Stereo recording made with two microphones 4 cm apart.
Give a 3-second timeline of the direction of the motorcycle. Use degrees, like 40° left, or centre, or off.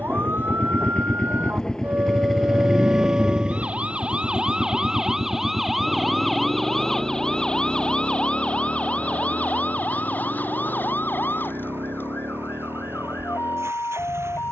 20° left, 30° right, 50° right, 60° right, 60° right.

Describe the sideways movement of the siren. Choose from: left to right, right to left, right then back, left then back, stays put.
right to left.